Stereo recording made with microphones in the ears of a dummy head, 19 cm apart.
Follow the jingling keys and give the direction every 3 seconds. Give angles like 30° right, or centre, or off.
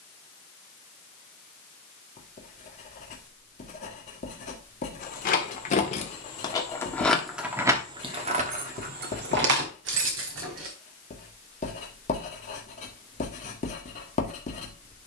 off, 40° left, 10° right, 60° right, off.